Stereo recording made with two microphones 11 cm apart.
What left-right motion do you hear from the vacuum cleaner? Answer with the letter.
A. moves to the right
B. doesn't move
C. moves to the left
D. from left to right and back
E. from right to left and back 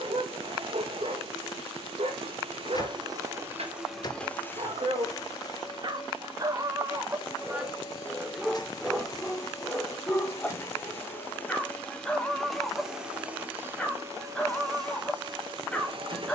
E.